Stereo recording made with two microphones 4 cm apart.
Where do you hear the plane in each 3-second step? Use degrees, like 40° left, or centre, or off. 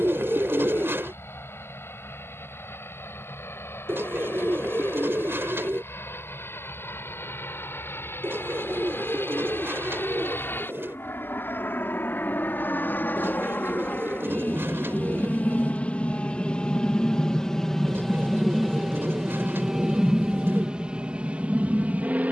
80° left, 70° left, 70° left, 60° left, 50° left, 20° left, 10° right, 30° right.